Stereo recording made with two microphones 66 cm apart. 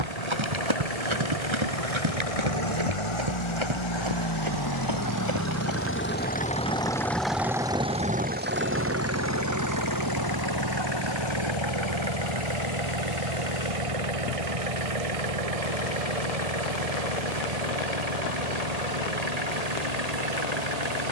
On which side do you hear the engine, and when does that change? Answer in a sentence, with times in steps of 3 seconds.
You can hear the engine on the left from 0 s, in the centre from 6 s and on the right from 9 s.